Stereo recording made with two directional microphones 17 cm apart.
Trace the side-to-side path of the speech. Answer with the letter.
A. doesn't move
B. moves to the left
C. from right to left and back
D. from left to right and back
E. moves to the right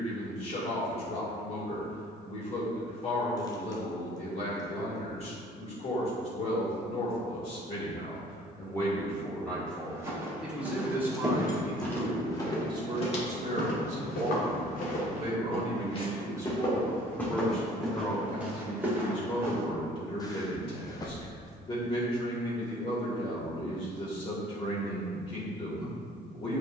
D.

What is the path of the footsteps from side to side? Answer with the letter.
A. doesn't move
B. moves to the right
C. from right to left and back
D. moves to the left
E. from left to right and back
C.